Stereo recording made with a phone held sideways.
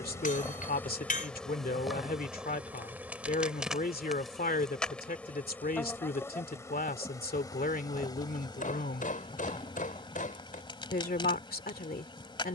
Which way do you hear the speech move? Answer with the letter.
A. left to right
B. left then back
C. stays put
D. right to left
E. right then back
C.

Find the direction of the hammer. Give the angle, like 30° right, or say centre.
60° left.